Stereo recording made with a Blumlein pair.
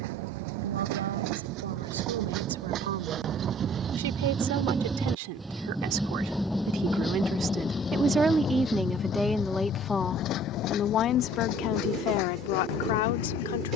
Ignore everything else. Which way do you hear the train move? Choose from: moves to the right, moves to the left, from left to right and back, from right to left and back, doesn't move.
moves to the left.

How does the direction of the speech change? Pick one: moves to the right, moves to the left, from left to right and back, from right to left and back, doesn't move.
moves to the left.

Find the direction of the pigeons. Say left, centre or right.
right.